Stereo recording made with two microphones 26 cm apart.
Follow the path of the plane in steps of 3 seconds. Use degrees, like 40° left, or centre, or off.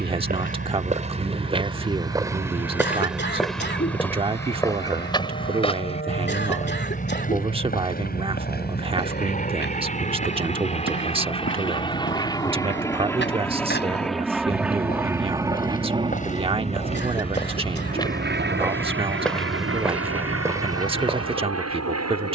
50° left, 50° left, 40° left, 30° left, 10° left, 20° right, 50° right, 60° right.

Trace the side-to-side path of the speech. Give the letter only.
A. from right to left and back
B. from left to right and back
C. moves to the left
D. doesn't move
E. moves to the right
D.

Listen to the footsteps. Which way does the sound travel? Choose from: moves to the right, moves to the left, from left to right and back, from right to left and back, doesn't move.
from right to left and back.